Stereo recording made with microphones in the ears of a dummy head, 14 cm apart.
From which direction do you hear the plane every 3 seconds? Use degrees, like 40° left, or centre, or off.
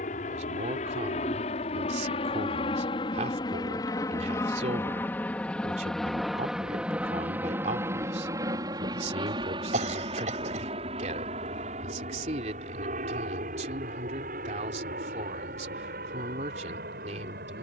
40° left, 20° left, 10° right, 30° right, 50° right, 50° right.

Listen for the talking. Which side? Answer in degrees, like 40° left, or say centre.
50° right.